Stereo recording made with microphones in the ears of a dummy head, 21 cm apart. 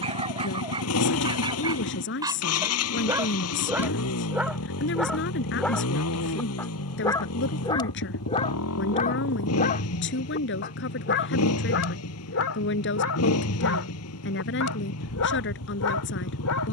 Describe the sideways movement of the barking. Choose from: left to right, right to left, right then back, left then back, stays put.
right to left.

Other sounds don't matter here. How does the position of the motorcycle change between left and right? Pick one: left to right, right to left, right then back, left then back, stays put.
stays put.